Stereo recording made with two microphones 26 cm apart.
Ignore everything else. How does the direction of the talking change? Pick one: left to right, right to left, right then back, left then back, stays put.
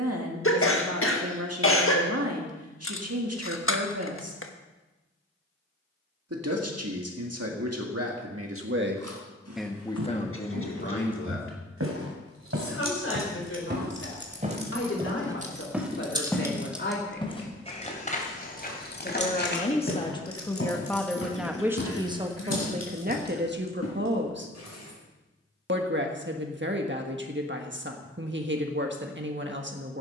left then back.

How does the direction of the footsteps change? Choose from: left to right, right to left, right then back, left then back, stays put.
right to left.